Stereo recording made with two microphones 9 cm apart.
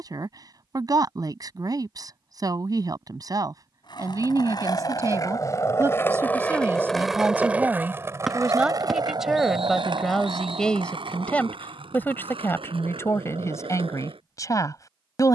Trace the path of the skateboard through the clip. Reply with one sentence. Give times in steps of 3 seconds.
In this clip you hear the skateboard not at all from 0 s, on the left from 3 s, in the centre from 6 s and on the right from 9 s.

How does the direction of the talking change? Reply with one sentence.
You can hear the talking go from the right side to the left.